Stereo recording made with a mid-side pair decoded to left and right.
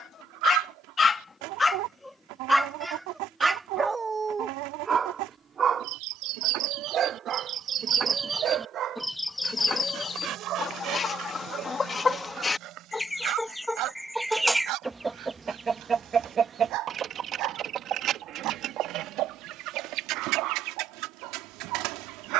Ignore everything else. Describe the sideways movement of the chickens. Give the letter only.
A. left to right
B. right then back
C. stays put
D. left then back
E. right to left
D.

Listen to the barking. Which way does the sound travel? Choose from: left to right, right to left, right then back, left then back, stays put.
left to right.